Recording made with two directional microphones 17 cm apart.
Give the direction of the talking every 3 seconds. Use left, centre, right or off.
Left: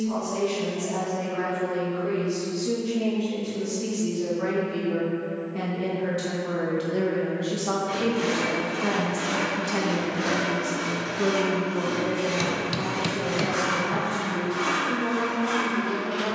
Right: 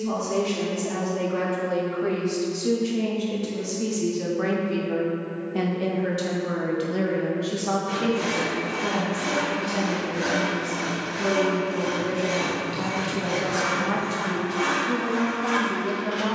right, right, centre, left, right, right.